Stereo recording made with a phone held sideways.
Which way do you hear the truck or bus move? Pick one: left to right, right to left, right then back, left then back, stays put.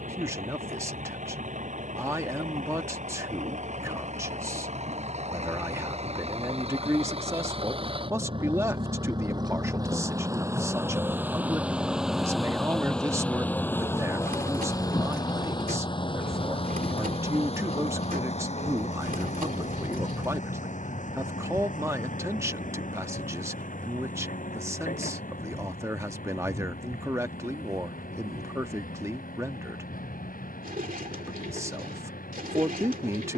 right to left.